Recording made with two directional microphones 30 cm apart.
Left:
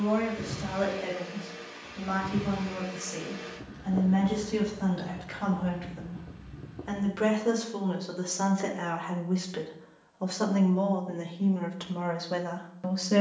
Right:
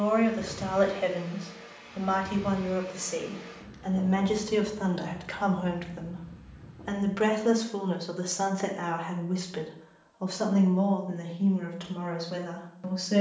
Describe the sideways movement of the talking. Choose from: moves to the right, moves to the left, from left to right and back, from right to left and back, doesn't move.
moves to the left.